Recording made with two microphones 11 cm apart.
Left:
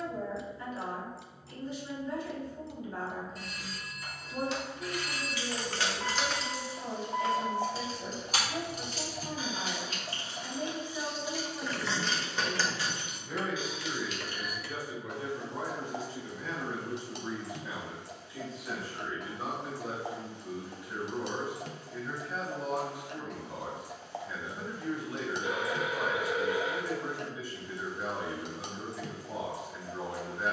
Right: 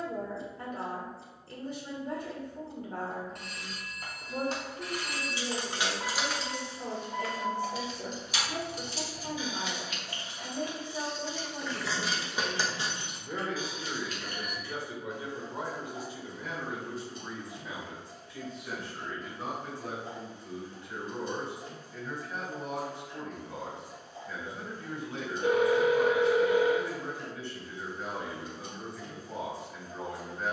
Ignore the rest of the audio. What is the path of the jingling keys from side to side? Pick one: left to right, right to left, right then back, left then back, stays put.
left then back.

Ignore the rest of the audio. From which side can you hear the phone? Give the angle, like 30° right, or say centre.
70° right.